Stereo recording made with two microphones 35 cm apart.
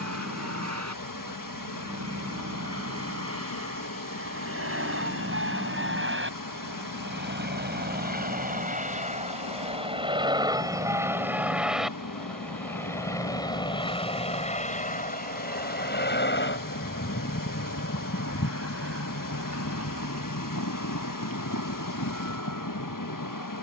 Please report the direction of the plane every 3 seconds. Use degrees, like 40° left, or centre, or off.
60° right, 50° right, 30° right, 10° right, 10° left, 30° left, 50° left, 60° left.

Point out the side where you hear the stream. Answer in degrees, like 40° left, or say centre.
80° left.